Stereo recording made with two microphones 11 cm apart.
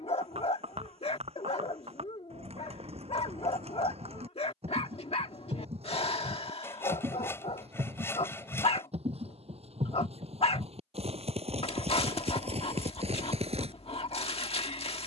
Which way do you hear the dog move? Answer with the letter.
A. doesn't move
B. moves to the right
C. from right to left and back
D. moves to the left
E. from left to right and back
A.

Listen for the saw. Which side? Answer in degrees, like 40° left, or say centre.
20° left.